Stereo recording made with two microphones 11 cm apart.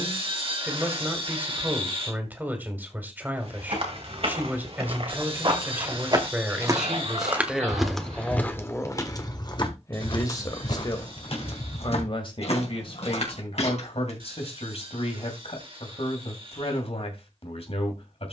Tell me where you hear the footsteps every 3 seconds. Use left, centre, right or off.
off, right, centre, left, left, off.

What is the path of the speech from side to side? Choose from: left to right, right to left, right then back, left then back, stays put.
right to left.